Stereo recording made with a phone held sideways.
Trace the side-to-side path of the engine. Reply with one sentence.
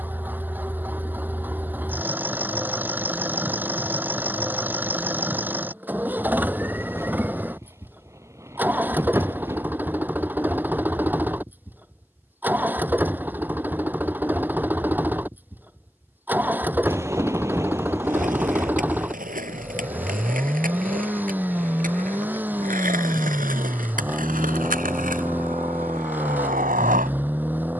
In this clip you hear the engine stay in one place.